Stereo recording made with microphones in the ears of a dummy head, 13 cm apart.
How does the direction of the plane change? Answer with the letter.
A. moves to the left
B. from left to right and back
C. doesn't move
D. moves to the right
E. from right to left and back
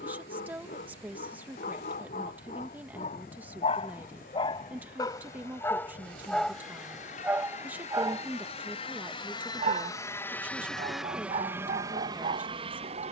D.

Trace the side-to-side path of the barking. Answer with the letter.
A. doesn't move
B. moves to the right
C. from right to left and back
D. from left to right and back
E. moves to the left
B.